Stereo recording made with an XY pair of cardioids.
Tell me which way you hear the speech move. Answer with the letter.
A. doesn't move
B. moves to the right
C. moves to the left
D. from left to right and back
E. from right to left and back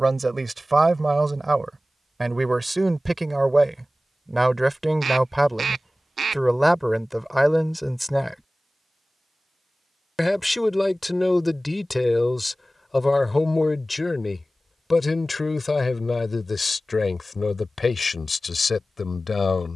C.